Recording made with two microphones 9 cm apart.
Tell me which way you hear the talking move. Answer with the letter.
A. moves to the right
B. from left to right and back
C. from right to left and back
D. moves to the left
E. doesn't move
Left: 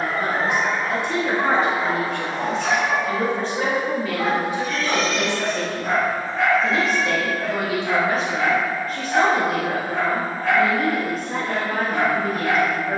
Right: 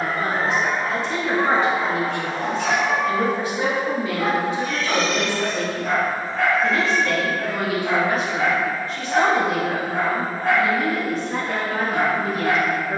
B.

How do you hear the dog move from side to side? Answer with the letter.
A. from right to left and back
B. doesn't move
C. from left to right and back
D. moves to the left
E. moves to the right
A.